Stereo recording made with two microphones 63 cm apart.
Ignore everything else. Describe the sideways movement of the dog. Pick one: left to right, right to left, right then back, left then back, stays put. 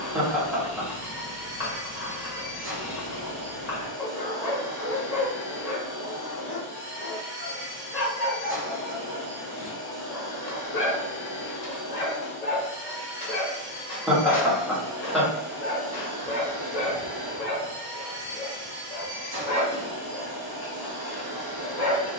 stays put.